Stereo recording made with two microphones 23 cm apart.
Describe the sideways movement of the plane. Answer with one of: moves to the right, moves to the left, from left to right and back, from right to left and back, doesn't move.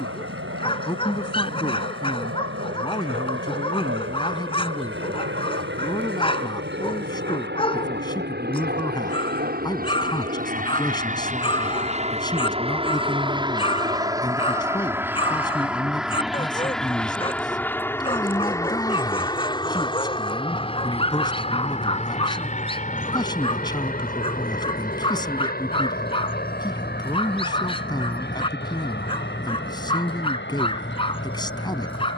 moves to the left.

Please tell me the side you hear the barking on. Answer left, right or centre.
left.